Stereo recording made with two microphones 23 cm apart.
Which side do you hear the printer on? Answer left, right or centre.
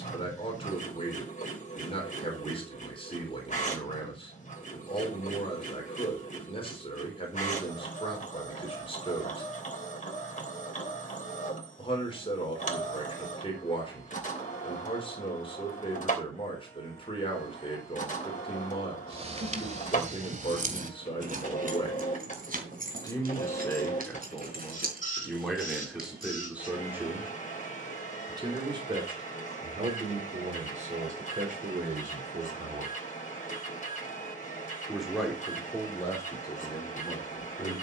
left.